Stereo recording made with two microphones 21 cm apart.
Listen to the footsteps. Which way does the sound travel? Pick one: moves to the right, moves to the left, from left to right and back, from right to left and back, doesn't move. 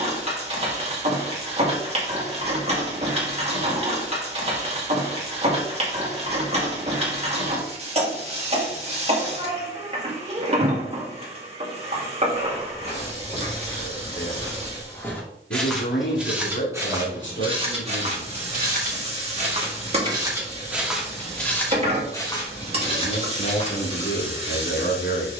from left to right and back.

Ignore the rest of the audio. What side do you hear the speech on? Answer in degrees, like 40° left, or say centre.
60° left.